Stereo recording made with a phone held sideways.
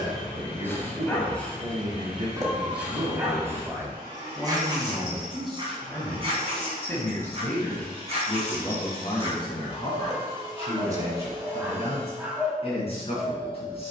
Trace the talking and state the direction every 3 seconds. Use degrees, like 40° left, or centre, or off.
30° right, 10° right, 20° left, 40° left, 40° left.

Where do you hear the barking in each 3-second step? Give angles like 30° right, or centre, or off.
10° left, 30° right, 40° right, 30° right, centre.